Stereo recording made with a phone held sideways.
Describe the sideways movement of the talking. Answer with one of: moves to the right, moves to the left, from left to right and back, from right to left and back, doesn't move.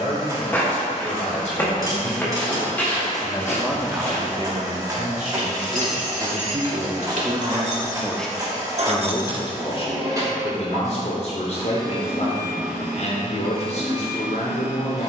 from left to right and back.